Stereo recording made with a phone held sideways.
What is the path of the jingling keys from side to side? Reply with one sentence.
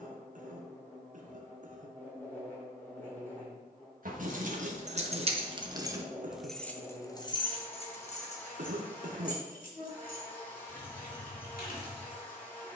In this clip you hear the jingling keys travel towards the left.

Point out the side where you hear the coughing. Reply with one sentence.
You can hear the coughing on the right.